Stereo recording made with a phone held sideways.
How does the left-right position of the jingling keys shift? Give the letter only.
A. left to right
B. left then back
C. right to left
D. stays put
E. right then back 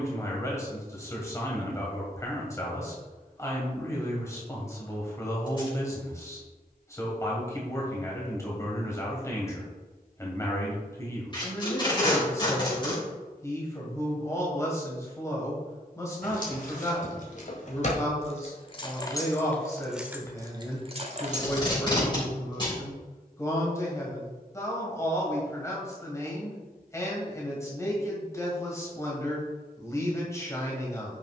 A.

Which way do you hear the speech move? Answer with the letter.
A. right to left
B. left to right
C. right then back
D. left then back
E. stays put
E.